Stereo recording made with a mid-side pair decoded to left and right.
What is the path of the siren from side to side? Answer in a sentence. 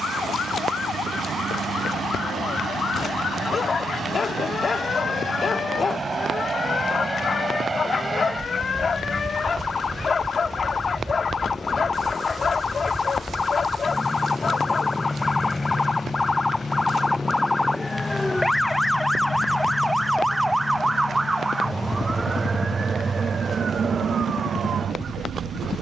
In this clip you hear the siren move to the right.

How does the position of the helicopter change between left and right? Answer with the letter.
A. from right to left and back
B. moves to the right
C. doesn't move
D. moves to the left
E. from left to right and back
D.